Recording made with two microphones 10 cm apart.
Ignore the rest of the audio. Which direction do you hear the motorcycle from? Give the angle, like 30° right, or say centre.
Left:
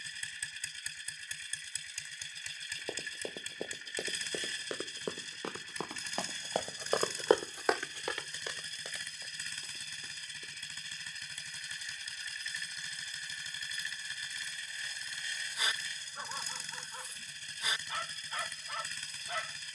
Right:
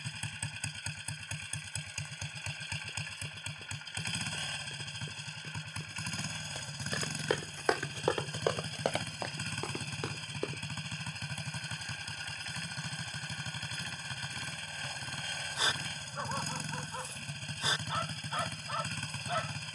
50° right.